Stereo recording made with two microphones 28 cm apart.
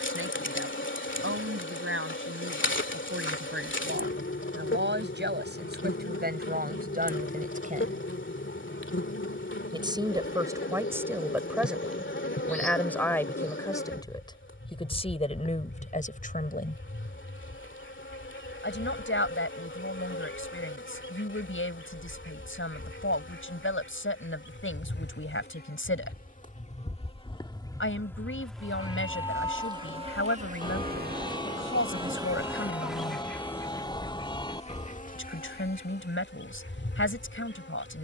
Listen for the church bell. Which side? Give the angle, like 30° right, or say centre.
20° left.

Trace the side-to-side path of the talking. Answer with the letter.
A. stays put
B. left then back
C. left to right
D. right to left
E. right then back
D.